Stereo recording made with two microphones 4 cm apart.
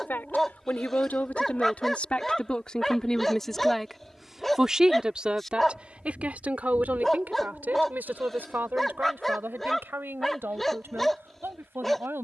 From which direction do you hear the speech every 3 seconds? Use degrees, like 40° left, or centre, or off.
40° left, 10° right, 40° right, 60° right.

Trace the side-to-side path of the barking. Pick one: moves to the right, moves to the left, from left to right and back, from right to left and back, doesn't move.
doesn't move.